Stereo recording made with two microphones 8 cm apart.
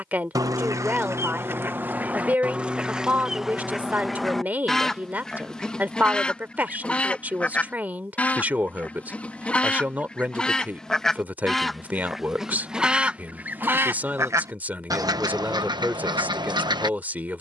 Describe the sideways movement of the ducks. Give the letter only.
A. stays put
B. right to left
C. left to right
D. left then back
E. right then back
D.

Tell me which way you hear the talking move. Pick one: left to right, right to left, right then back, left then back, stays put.
stays put.